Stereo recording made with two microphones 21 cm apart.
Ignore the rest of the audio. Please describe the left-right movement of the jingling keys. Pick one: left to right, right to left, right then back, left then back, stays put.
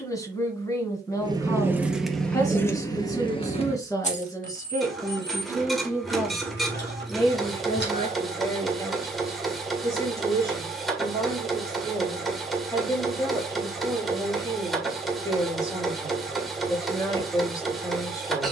right to left.